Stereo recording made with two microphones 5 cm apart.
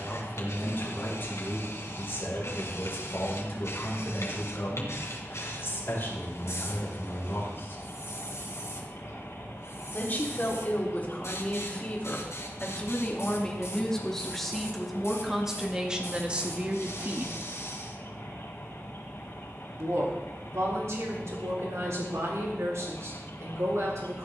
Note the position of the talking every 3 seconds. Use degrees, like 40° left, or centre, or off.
50° left, 50° left, 50° left, 40° left, 10° left, 20° right, 70° right, 70° right.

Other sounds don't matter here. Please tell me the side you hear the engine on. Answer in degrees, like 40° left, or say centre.
60° left.